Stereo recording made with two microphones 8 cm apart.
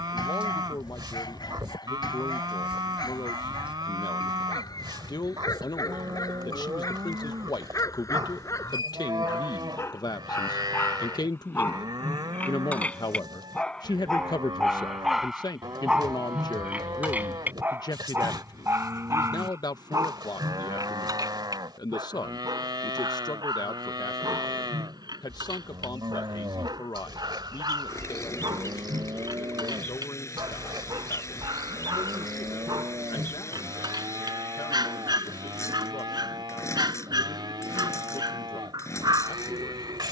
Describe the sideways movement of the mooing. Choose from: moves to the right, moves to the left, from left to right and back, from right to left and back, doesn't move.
doesn't move.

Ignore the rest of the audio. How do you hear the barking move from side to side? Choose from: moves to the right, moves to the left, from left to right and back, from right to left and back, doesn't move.
moves to the right.